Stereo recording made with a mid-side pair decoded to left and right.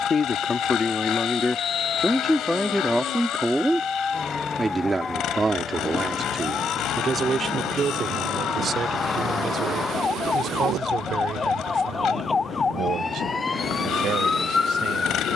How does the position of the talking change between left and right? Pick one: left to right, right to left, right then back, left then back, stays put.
left to right.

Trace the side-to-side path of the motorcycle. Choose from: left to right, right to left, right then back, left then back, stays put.
stays put.